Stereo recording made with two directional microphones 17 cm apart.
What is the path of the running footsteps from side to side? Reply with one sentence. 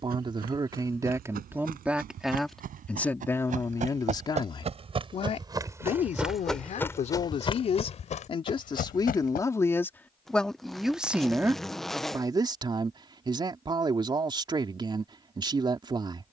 In this clip you hear the running footsteps move to the left.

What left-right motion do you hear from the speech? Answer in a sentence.
In this clip you hear the speech move from right to left and back again.